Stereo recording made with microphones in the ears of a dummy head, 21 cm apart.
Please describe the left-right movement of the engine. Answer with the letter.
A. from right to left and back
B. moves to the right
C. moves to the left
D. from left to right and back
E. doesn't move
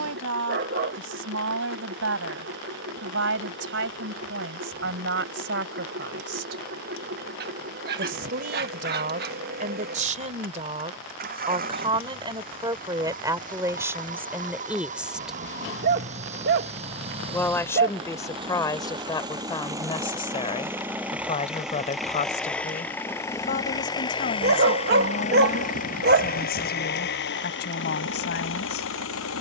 C.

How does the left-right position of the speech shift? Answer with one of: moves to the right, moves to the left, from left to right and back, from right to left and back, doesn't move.
moves to the left.